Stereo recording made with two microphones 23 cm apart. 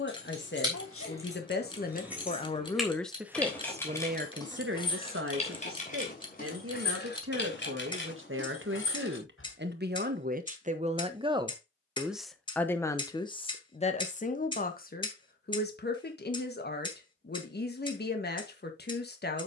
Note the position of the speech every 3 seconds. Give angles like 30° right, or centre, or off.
40° left, 40° right, 70° right, 40° right, 20° left, 50° left, 50° left.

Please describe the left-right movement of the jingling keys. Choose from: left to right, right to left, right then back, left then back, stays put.
right to left.